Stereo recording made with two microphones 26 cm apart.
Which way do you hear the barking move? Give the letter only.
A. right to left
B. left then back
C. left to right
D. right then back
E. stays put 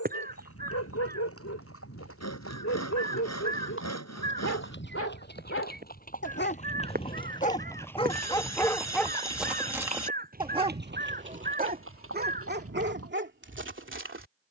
C.